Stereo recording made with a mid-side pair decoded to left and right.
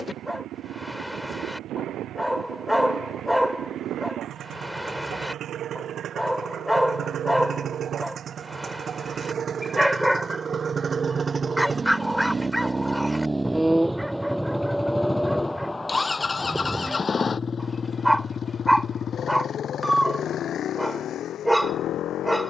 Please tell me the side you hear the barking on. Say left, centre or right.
centre.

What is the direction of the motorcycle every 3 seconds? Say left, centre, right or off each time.
right, right, right, right, centre, left, left, left.